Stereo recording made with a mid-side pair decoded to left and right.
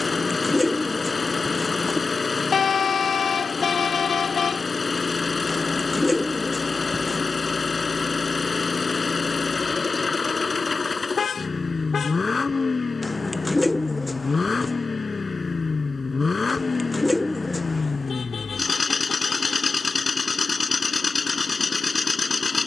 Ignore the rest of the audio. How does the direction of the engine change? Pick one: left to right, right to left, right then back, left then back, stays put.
stays put.